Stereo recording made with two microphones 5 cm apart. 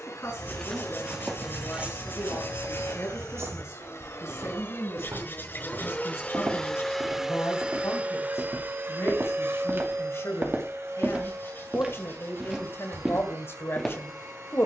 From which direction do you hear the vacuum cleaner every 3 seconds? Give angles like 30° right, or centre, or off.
70° left, 50° left, 10° right, 60° right, 70° right.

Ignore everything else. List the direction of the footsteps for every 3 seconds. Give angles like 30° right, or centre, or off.
20° right, 70° right, 60° right, 40° right, centre.